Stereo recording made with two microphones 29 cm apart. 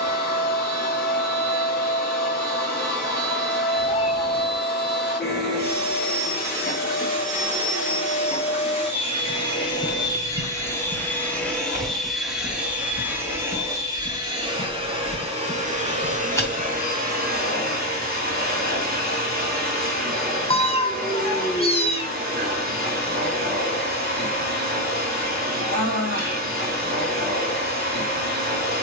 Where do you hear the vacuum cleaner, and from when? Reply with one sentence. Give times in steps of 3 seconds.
In this clip you hear the vacuum cleaner on the left from 0 s, in the centre from 9 s and on the right from 15 s.